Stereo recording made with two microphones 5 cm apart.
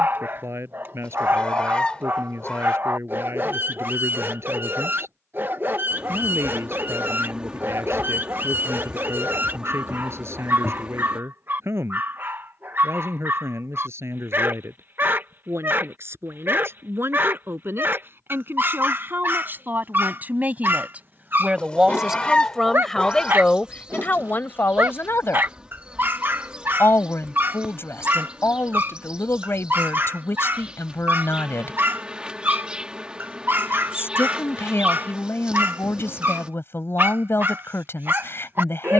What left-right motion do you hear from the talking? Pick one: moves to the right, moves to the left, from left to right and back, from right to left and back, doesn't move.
moves to the left.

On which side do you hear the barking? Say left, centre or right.
right.